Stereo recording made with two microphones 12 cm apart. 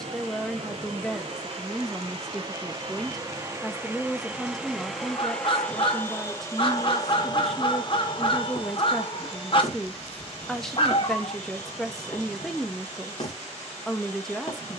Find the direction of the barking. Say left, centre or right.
left.